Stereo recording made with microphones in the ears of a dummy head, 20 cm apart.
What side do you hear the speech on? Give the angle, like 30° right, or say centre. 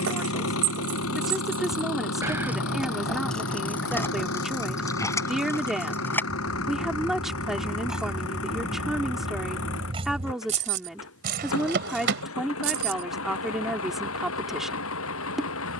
centre.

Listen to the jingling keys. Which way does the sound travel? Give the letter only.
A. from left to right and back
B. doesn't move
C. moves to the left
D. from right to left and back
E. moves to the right
D.